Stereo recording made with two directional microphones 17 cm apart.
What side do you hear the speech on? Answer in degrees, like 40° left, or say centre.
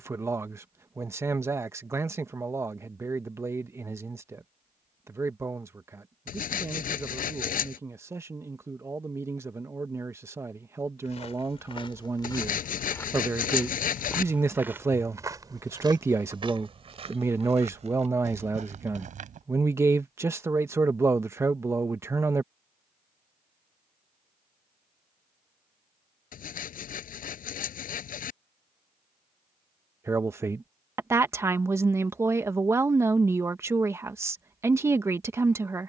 20° right.